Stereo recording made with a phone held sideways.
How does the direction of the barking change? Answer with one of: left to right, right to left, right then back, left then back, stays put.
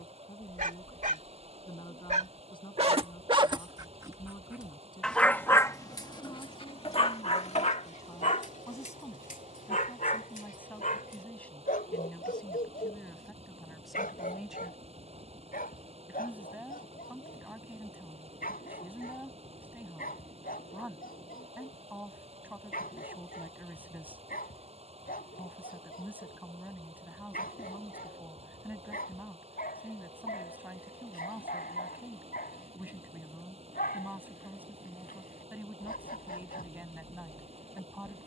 right to left.